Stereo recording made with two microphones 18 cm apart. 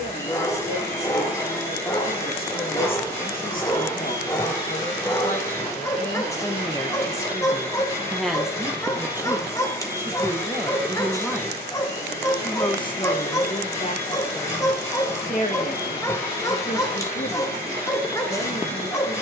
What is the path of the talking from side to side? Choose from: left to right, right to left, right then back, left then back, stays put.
right then back.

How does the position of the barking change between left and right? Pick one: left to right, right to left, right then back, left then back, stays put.
stays put.